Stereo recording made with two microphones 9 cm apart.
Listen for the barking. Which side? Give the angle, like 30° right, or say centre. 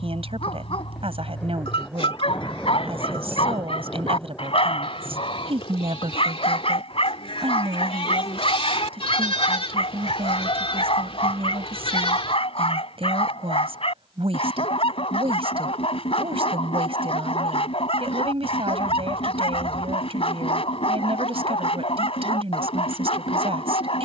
80° left.